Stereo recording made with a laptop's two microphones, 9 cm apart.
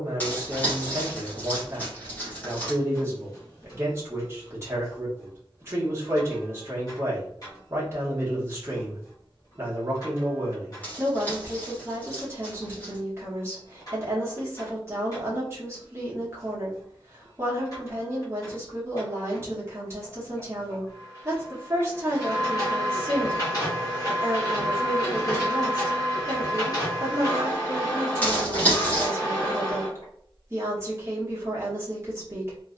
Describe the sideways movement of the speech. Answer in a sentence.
In this clip you hear the speech stay in one place.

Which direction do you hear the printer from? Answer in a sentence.
You can hear the printer on the left.